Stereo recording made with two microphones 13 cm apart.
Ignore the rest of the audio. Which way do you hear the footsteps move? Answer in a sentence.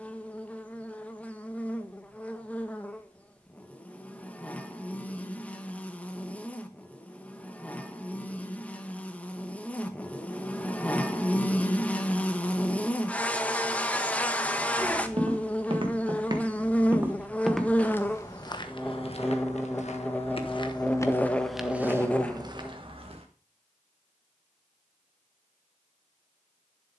You can hear the footsteps go left and come back.